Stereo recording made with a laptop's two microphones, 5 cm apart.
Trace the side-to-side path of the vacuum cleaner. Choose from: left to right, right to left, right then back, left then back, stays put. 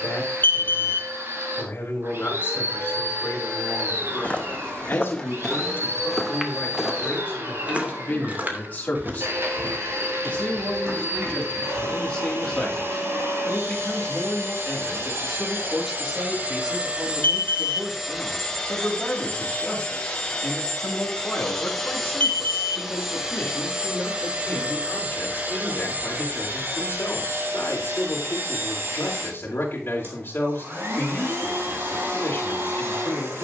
left then back.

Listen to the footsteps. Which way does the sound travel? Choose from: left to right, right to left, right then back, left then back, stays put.
left to right.